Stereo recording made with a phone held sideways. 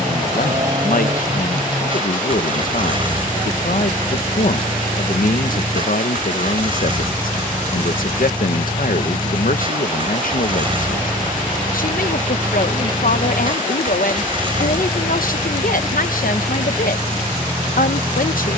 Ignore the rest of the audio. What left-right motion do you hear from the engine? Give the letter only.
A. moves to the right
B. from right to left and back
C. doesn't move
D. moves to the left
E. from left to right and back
C.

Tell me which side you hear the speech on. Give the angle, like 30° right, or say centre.
70° left.